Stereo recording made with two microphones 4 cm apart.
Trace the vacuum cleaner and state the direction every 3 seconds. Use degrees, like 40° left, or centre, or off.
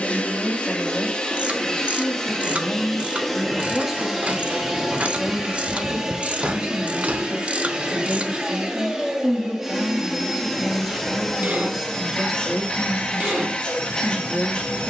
20° left, centre, 20° right, centre, 20° left.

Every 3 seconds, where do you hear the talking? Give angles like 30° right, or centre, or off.
20° left, 20° right, 40° right, 20° right, 10° left.